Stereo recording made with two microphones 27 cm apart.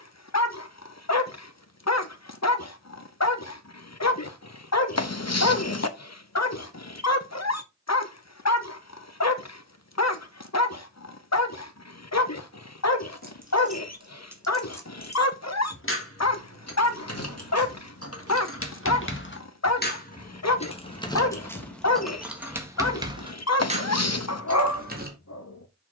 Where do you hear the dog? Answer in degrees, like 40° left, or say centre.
70° left.